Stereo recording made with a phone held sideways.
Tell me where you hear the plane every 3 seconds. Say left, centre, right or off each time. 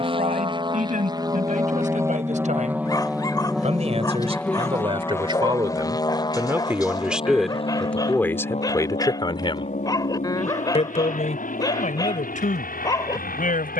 right, centre, left, left, left.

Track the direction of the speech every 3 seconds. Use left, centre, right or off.
right, right, centre, left, left.